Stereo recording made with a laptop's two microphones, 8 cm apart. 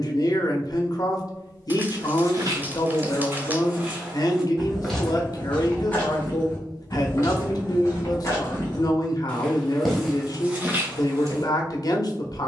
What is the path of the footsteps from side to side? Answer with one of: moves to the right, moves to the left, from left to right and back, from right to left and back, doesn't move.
from right to left and back.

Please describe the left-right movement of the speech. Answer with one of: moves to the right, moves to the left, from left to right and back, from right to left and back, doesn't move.
doesn't move.